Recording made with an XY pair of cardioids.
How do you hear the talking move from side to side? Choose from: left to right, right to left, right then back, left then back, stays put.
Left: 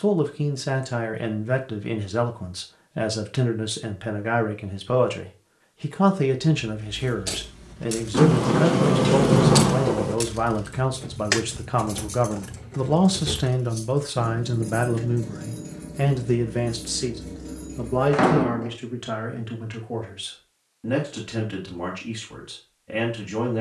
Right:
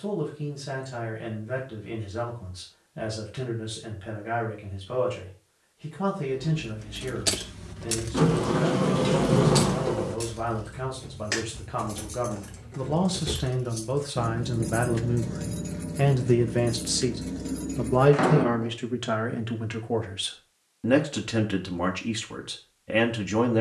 left to right.